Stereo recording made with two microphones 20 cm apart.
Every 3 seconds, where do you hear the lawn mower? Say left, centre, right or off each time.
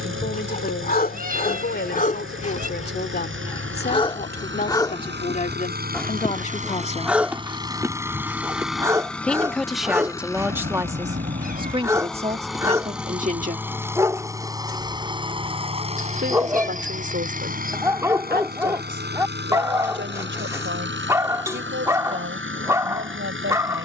right, right, right, centre, centre, right, right, right.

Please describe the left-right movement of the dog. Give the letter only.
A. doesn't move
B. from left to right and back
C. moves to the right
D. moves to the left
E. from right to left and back
C.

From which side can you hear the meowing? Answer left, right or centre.
right.